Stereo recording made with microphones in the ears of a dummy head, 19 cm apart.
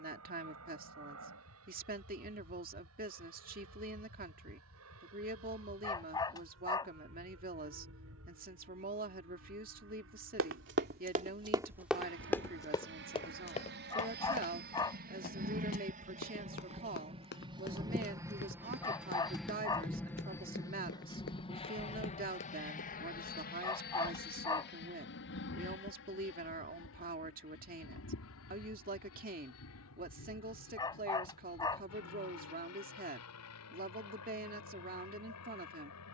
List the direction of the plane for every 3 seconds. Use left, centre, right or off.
right, right, right, right, right, right, centre, left, left, left, left, left.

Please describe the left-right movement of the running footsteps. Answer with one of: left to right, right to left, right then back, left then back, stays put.
right to left.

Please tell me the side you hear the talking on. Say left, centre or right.
right.